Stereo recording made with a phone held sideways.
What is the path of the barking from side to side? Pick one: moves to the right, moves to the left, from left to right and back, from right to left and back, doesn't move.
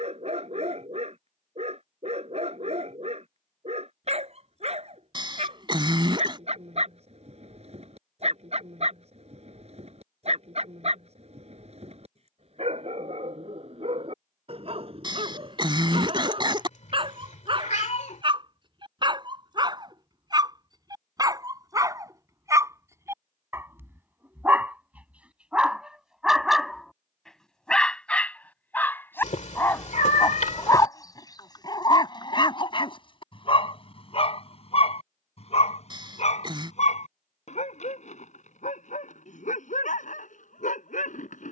moves to the left.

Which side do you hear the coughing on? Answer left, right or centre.
right.